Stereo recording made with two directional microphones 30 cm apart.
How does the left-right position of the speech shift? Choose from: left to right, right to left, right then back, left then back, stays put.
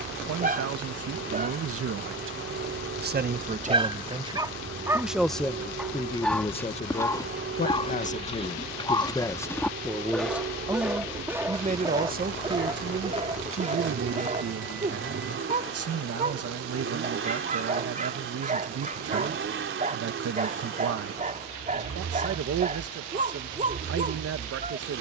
left then back.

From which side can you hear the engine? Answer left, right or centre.
right.